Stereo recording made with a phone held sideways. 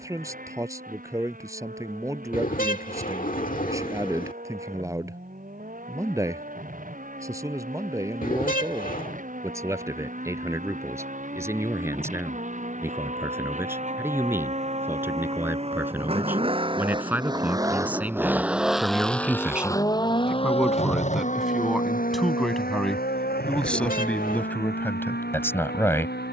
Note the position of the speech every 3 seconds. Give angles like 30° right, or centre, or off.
20° right, 20° right, 20° right, 20° right, 20° right, 10° right, 10° right, centre, 10° left.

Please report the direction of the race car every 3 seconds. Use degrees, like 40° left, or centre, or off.
70° right, 70° right, 70° right, 60° right, 50° right, 40° right, 10° left, 60° left, 80° left.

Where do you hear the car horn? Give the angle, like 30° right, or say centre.
60° left.